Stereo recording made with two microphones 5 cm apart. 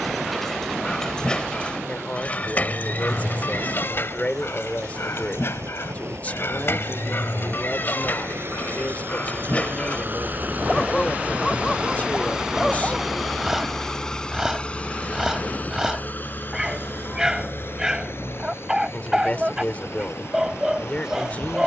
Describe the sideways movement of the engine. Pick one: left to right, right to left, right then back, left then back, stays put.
right to left.